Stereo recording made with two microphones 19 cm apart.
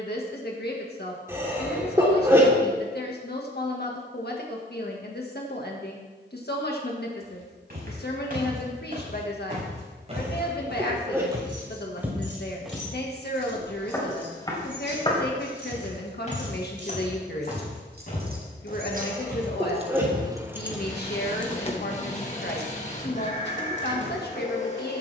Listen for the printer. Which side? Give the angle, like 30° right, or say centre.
40° left.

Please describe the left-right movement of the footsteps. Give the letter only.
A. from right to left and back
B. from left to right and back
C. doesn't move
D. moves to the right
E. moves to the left
E.